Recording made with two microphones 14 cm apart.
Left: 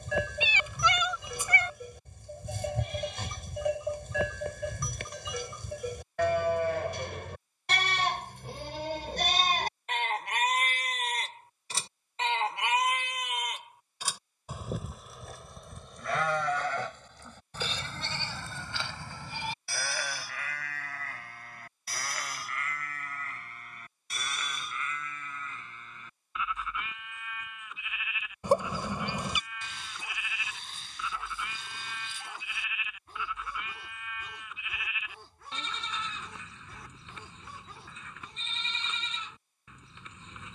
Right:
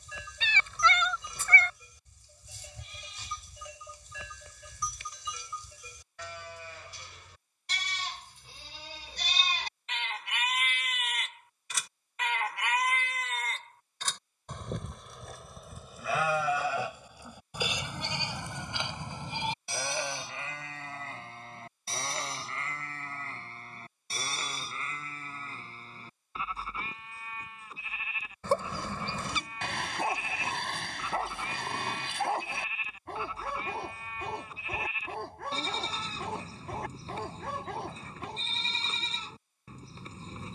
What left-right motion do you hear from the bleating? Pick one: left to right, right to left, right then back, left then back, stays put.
left to right.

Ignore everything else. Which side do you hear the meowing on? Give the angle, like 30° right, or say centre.
10° left.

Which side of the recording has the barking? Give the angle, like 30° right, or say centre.
70° right.